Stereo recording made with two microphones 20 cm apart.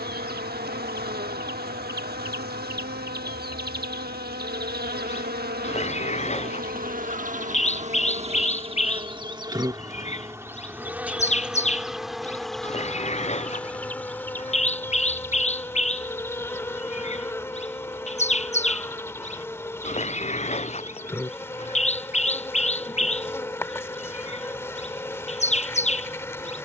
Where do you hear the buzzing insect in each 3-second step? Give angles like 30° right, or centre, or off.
50° right, 50° right, 40° right, 10° right, 10° left, 10° left, 10° left, 10° left, 10° left.